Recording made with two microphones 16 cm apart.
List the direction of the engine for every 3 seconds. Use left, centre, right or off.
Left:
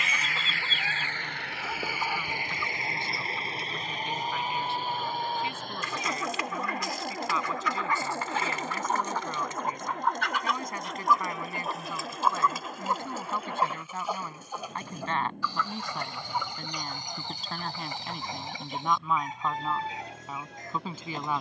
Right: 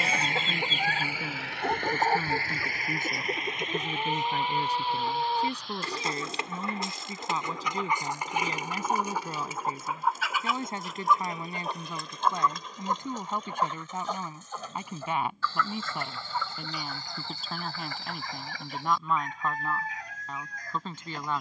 centre, left, left, left, left, left, left.